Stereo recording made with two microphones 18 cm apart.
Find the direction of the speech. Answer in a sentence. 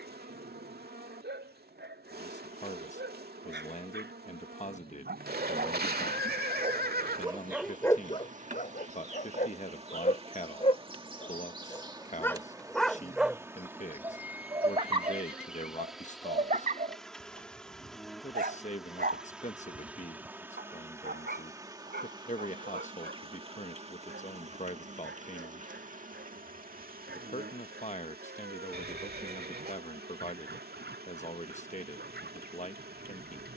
You can hear the speech on the left.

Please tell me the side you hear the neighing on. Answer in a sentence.
You can hear the neighing on the right.